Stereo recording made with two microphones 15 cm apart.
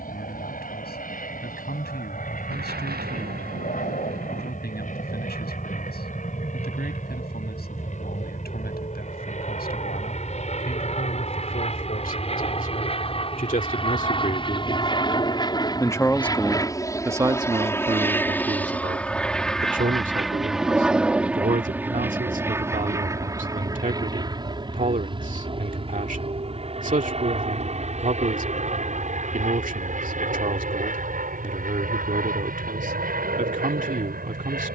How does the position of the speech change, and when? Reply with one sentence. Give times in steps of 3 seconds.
In this clip you hear the speech on the left from 0 s, in the centre from 15 s and on the right from 18 s.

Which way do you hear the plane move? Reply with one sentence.
You can hear the plane travel towards the right.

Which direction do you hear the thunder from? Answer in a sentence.
You can hear the thunder on the right.